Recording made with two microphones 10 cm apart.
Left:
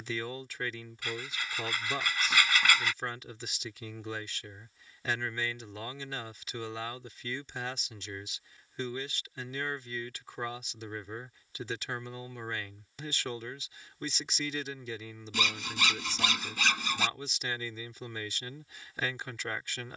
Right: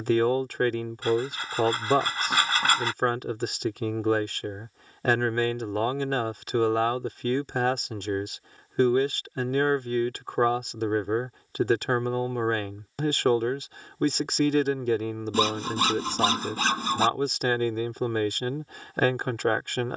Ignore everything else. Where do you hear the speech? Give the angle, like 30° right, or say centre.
60° right.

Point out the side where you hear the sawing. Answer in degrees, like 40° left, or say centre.
40° right.